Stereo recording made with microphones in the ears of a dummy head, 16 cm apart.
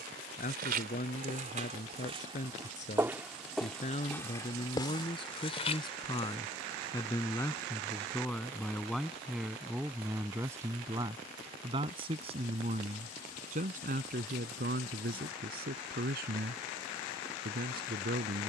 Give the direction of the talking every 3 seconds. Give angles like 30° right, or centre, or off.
40° left, 30° left, 10° left, 10° right, 40° right, 50° right.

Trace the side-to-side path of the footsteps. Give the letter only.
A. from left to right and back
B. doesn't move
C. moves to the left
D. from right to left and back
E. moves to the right
C.